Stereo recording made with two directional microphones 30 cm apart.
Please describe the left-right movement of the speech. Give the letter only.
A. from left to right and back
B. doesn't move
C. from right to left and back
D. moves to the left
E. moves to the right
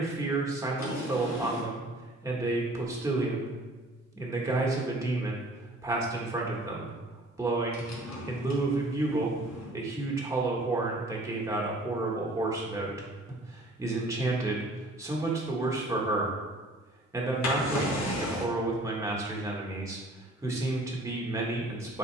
B.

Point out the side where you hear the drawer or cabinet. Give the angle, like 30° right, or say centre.
60° left.